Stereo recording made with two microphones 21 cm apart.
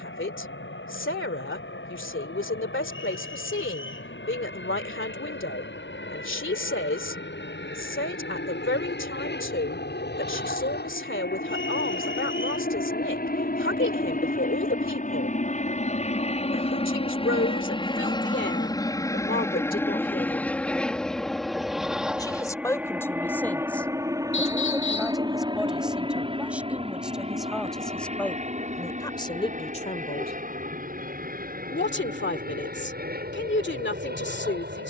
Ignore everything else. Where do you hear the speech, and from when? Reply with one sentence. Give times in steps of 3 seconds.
In this clip you hear the speech on the left from 0 s, in the centre from 21 s and on the left from 30 s.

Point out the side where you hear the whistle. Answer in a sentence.
You can hear the whistle on the left.